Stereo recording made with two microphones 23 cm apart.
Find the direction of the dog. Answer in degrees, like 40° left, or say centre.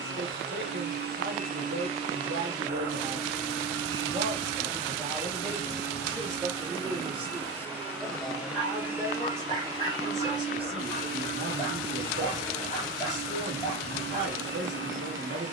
20° left.